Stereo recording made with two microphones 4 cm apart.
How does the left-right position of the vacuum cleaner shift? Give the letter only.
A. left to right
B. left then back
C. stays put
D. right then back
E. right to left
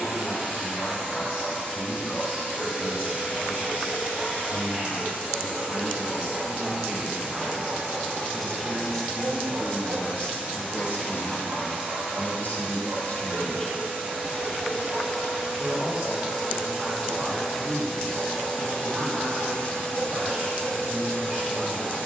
E.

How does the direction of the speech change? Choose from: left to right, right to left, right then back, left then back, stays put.
left then back.